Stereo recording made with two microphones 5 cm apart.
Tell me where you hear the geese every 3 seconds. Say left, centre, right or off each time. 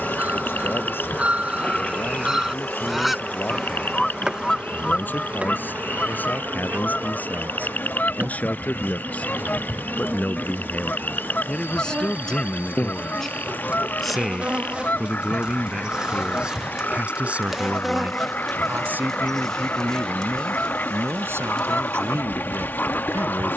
right, centre, left, left, left, left, left, left.